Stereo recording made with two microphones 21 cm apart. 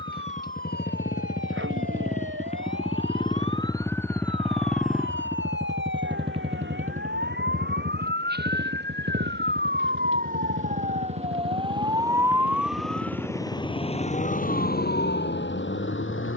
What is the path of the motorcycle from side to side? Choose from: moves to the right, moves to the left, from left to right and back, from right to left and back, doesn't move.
moves to the right.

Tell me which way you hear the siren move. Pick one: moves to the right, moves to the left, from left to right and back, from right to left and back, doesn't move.
moves to the left.